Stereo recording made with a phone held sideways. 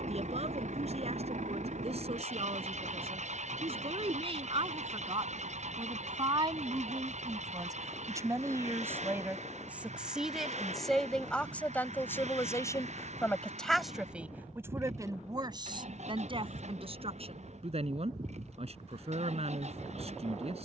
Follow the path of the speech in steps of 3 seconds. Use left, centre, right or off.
right, right, right, centre, centre, right, right.